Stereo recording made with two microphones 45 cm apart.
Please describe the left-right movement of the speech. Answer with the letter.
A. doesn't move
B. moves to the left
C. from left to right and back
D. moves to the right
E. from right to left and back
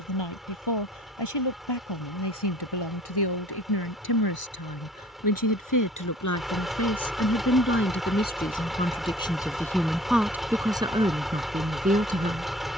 D.